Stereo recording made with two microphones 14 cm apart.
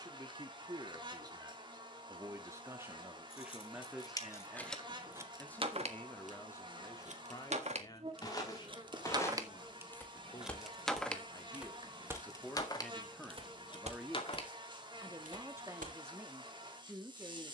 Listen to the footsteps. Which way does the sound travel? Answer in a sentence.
In this clip you hear the footsteps move from left to right.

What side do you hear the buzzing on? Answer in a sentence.
You can hear the buzzing on the right.